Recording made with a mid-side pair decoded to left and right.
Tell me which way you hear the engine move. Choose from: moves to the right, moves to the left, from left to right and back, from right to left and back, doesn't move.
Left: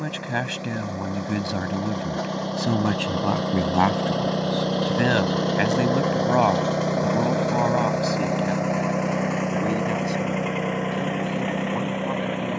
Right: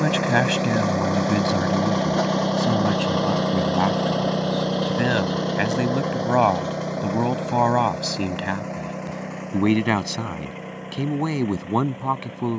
moves to the left.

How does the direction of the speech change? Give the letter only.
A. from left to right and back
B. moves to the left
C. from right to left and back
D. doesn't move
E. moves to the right
C.